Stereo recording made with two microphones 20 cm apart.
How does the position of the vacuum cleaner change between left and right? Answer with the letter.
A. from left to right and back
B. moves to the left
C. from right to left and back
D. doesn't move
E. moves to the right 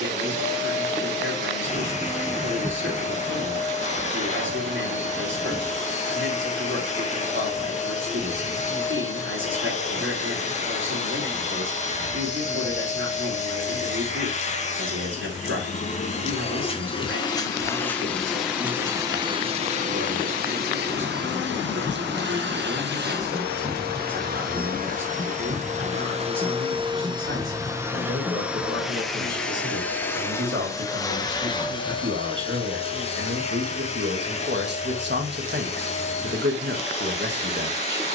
A.